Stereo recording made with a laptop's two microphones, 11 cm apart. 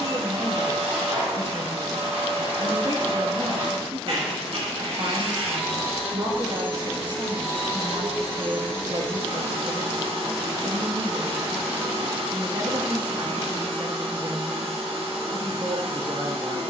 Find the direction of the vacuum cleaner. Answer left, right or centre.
right.